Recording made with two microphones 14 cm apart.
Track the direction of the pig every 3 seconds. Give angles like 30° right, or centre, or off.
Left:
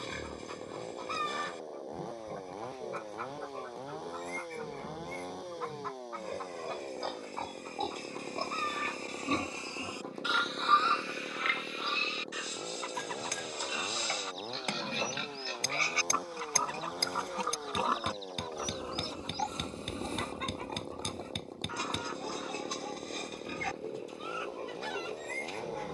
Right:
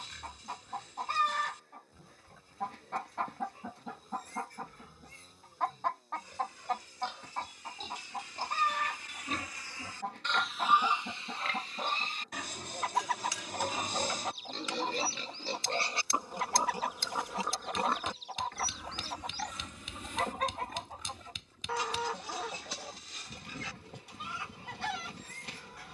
60° left, 60° left, 50° left, centre, 50° right, 20° right, 30° left, 50° left, 60° left.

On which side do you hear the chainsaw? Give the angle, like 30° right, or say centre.
80° left.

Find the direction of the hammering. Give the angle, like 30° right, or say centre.
60° left.